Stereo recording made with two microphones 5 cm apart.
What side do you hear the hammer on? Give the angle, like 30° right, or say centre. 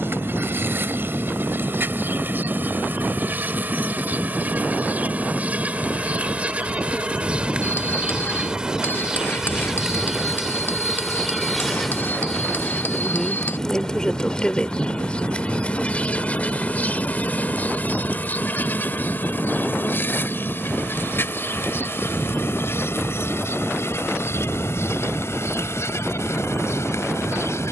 40° left.